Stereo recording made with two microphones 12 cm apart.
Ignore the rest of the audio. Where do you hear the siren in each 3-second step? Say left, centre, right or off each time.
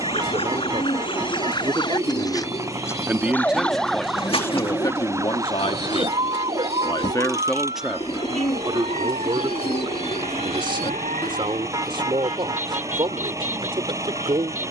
left, centre, right, right, right.